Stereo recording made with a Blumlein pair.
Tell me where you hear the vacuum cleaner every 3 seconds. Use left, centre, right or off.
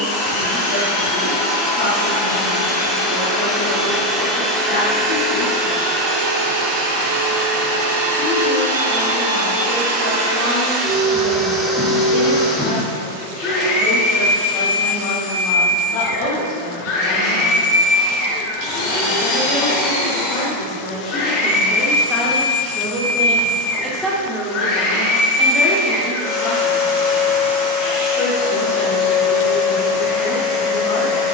left, centre, right, right, left, left, left, left, left, left, left.